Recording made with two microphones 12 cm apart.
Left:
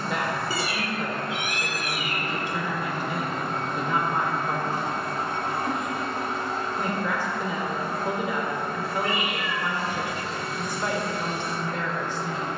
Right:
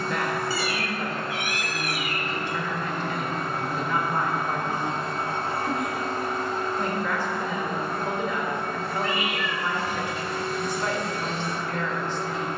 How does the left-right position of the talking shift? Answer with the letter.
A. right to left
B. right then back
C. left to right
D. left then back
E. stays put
E.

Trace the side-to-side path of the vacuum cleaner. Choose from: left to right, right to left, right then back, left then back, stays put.
left to right.